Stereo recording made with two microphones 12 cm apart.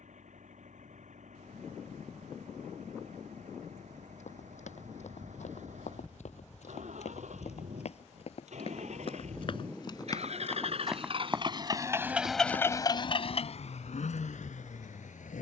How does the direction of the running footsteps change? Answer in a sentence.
You can hear the running footsteps move to the right.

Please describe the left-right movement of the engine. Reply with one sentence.
In this clip you hear the engine move to the left.